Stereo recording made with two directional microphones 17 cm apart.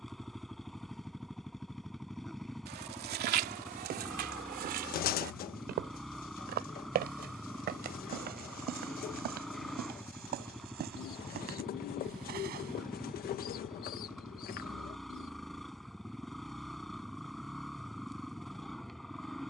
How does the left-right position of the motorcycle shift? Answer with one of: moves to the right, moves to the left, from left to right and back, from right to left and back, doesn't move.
doesn't move.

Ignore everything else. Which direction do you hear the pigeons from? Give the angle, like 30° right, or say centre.
60° left.